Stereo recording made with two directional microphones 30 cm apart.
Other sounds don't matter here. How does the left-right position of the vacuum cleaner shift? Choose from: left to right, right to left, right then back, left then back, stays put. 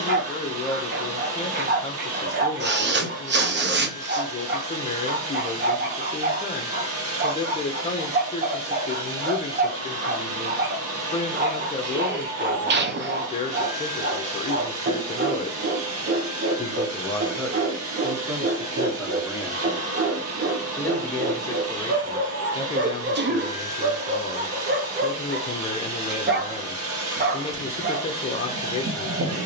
stays put.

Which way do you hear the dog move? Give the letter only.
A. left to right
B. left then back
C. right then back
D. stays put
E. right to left
D.